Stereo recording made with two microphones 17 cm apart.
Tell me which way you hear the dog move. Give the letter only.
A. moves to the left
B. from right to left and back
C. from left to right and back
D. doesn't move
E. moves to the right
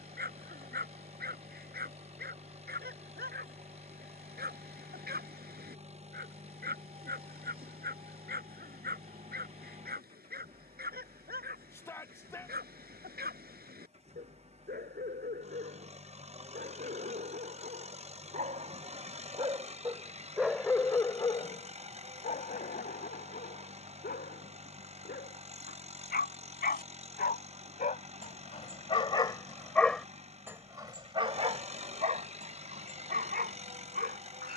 B.